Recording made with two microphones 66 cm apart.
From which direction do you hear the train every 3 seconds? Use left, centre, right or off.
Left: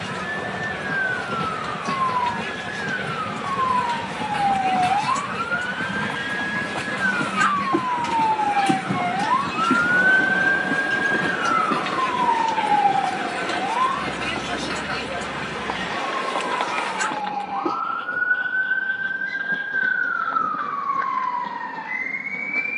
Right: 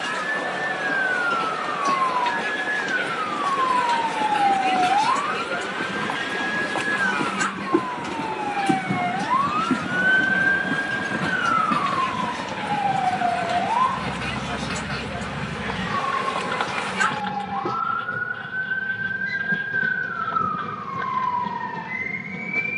left, left, centre, centre, right, right, right, right.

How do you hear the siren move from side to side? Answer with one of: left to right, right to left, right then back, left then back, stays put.
left to right.